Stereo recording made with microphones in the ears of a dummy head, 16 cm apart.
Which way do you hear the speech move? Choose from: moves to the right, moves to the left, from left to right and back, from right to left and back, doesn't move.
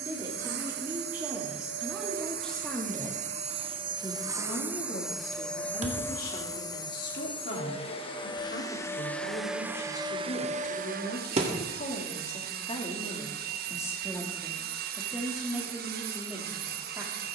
from right to left and back.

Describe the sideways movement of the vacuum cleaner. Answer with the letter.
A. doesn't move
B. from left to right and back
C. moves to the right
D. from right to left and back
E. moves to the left
D.